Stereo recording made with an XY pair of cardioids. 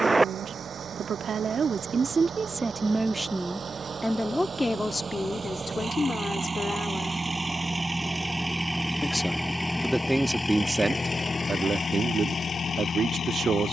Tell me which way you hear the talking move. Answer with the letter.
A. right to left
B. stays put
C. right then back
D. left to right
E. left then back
E.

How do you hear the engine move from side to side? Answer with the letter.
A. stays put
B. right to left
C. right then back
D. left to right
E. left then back
B.